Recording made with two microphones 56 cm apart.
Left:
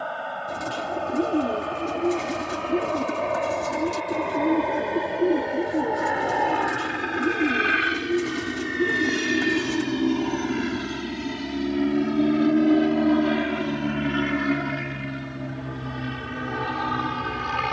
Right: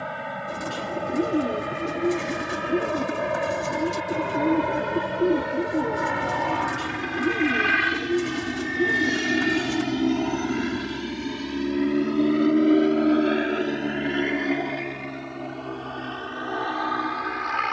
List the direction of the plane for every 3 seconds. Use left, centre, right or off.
right, right, right, centre, left, left.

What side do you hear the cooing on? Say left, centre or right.
centre.